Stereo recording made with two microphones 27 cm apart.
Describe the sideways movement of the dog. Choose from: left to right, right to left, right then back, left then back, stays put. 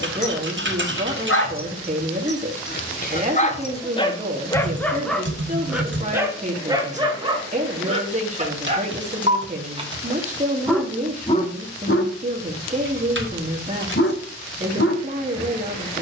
right then back.